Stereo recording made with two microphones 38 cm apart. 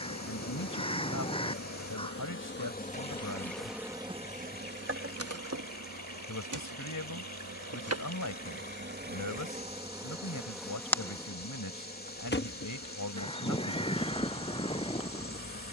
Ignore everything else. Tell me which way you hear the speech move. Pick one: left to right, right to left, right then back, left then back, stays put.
stays put.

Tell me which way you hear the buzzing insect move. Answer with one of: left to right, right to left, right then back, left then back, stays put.
right then back.